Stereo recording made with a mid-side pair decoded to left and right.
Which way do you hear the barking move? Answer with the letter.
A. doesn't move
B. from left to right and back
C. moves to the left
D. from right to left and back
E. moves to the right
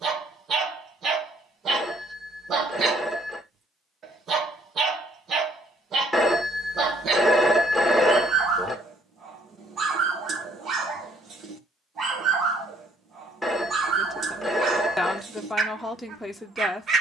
A.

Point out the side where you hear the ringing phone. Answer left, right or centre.
centre.